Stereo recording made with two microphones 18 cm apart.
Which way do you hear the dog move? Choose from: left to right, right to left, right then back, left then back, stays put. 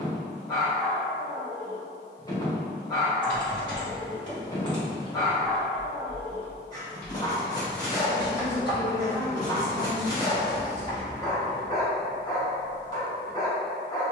stays put.